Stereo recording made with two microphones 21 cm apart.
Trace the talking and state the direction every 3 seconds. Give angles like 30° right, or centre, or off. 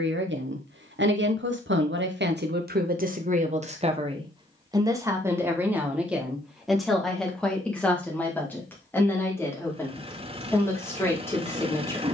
60° right, 20° right, centre, 10° left.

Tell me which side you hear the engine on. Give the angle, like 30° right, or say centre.
30° right.